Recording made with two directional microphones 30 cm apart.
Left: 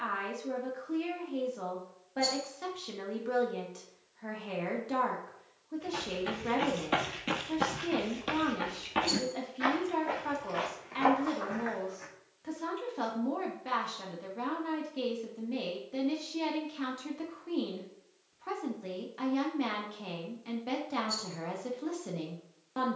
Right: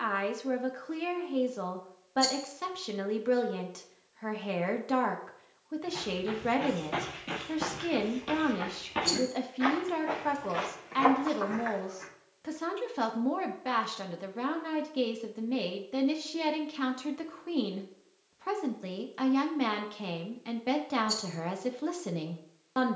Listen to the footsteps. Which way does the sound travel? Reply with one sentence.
In this clip you hear the footsteps move to the right.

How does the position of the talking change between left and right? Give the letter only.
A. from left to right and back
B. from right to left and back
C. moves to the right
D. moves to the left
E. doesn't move
E.